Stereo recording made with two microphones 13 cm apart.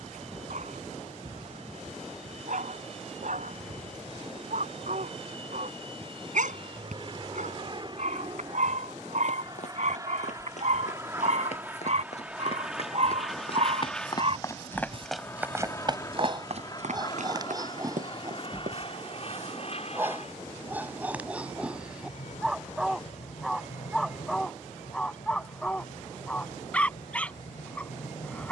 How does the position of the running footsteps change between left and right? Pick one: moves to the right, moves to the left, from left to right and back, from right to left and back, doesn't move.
moves to the right.